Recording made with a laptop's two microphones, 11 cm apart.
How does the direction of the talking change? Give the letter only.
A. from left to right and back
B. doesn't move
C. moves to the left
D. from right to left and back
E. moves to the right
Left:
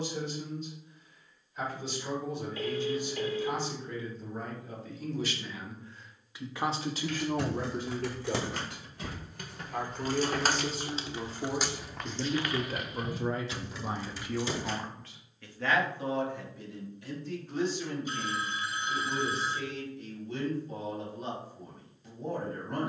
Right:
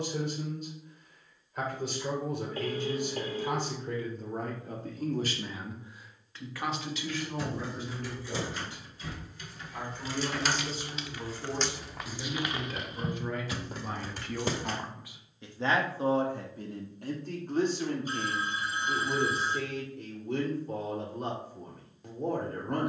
D.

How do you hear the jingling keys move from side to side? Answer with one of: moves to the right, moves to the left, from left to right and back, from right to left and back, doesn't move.
moves to the right.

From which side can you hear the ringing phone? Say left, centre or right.
right.